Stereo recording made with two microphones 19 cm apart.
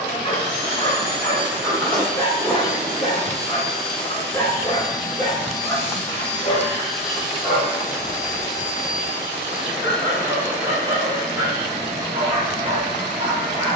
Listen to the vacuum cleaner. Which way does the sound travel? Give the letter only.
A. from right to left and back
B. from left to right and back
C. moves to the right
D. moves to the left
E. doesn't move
A.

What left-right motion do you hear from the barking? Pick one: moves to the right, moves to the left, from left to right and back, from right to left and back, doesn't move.
moves to the right.